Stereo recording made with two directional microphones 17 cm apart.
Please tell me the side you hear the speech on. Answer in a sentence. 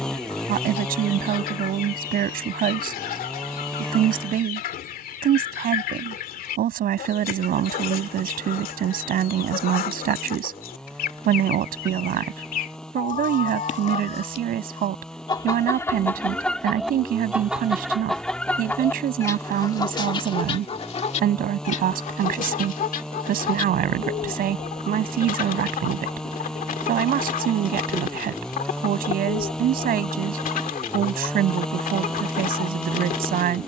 In this clip you hear the speech on the right.